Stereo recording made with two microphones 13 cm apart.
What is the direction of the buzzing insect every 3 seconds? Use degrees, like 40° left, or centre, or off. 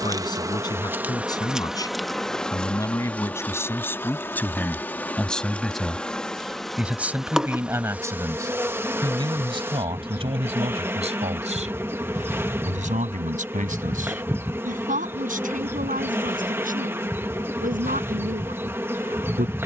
10° right, 10° left, 10° right, 20° right, 20° right, 20° right, 20° right.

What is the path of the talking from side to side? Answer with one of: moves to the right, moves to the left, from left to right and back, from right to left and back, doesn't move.
moves to the right.